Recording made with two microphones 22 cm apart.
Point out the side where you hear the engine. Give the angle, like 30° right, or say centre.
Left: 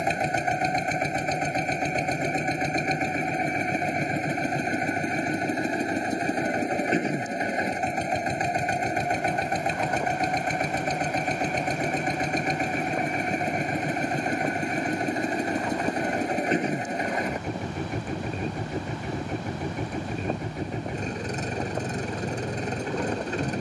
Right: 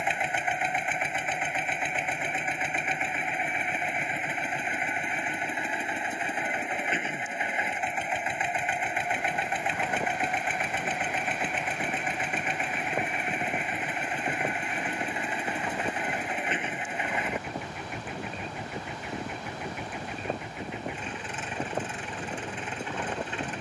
40° left.